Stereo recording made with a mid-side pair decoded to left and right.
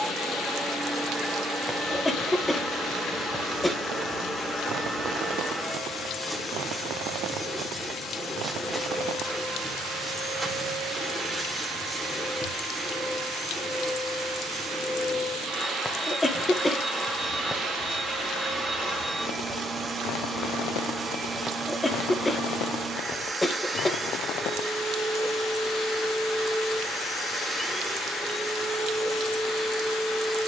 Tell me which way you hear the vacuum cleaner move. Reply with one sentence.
In this clip you hear the vacuum cleaner stay in one place.